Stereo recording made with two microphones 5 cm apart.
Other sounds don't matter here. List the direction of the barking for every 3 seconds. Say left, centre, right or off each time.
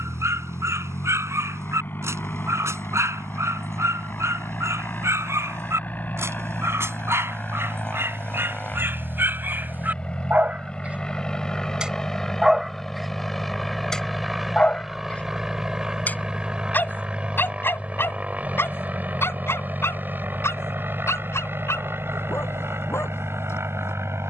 right, right, right, right, centre, left, left, left.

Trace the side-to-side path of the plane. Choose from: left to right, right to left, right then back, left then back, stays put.
left to right.